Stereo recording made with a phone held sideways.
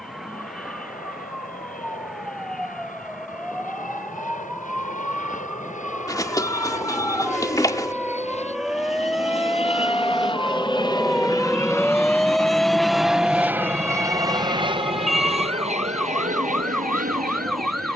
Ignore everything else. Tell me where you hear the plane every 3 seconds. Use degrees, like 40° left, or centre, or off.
70° left, 60° left, 50° left, 30° left, 10° right, 50° right.